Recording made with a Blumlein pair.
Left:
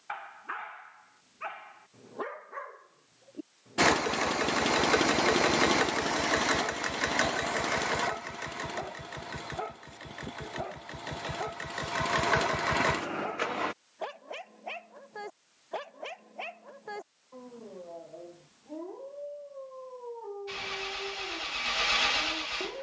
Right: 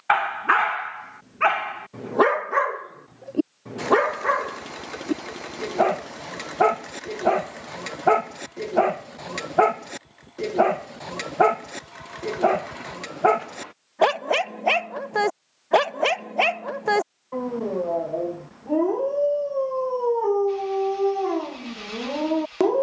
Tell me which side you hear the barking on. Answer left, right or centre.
right.